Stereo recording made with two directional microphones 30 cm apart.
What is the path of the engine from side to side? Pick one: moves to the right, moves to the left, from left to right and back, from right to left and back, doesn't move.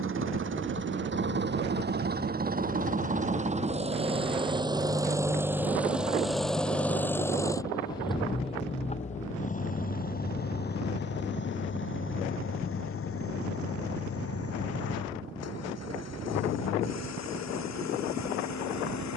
moves to the left.